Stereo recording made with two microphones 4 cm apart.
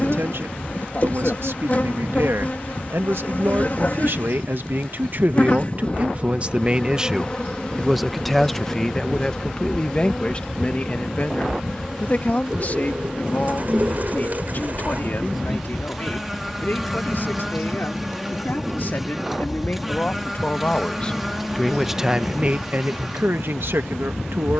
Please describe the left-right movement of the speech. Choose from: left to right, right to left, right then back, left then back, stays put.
left then back.